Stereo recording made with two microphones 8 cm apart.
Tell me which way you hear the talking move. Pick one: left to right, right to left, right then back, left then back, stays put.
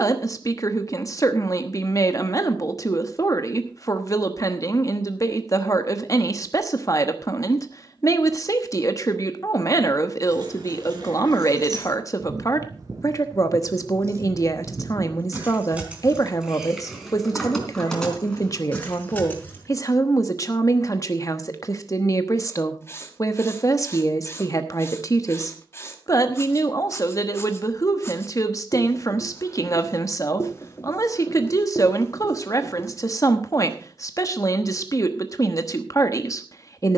stays put.